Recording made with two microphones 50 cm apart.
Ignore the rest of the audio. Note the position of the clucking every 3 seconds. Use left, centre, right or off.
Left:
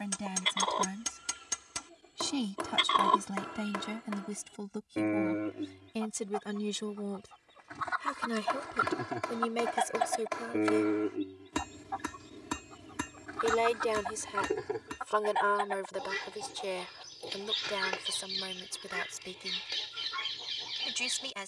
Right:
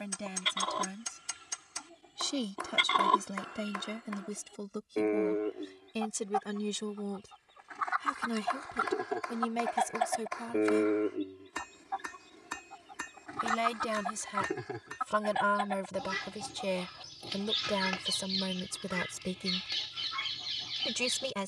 right, left, left, left, right, right, right.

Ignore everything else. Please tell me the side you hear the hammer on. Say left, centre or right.
left.